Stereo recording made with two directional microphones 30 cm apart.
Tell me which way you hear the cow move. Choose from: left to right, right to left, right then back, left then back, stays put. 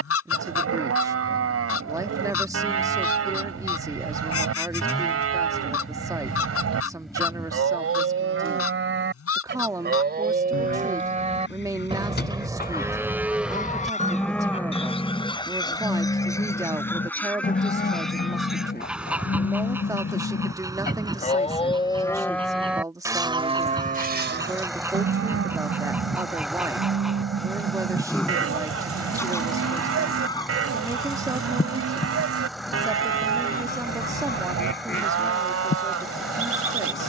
left then back.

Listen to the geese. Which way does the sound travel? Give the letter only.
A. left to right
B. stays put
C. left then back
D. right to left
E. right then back
E.